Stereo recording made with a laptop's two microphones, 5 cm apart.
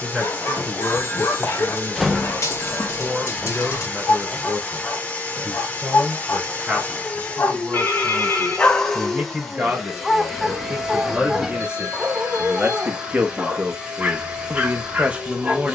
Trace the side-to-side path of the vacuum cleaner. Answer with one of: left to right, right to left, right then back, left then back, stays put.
left to right.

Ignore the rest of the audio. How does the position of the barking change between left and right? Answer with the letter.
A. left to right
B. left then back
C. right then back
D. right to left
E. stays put
A.